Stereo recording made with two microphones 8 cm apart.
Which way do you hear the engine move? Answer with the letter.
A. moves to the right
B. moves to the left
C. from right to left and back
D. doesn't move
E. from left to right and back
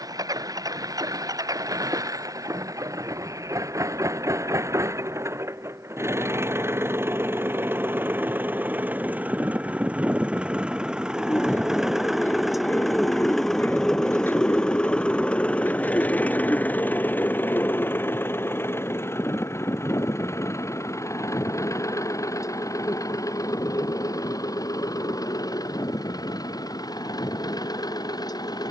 B.